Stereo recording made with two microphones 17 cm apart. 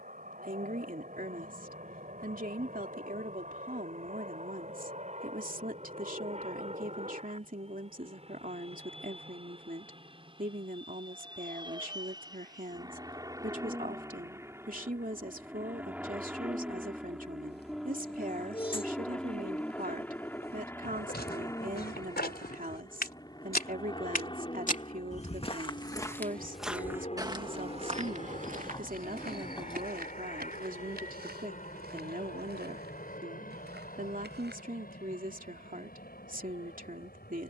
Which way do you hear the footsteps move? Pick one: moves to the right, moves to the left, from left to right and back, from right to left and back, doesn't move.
moves to the right.